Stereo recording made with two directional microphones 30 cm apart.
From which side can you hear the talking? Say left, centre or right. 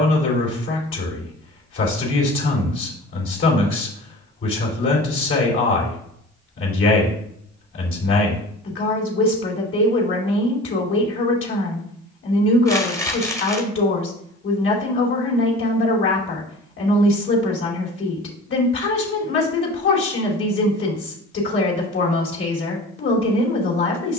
left.